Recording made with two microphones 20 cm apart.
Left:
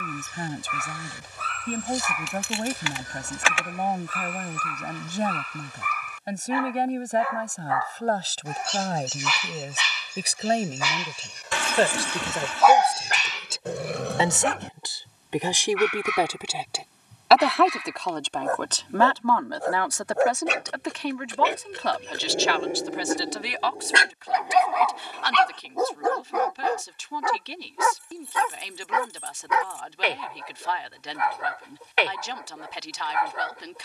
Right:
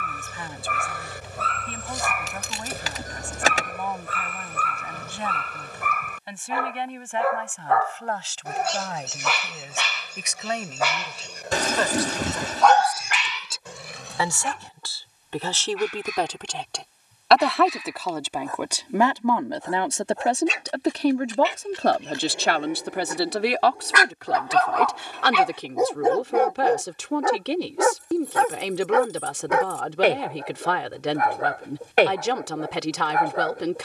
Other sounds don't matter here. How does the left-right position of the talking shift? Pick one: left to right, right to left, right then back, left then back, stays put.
left to right.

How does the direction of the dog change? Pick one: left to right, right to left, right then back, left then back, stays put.
left then back.